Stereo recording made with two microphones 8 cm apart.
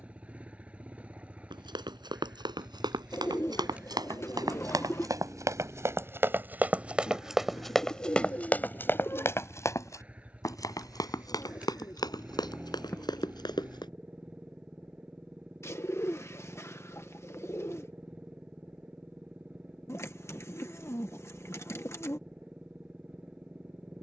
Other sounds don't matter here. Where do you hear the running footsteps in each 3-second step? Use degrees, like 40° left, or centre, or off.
70° right, 50° right, centre, 40° left, 60° left, off, off, off.